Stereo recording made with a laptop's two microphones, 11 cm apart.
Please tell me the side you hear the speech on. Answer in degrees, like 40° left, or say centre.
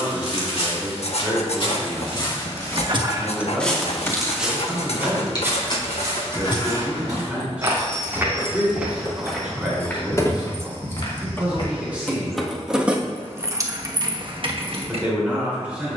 10° right.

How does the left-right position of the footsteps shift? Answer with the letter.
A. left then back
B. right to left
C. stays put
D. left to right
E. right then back
E.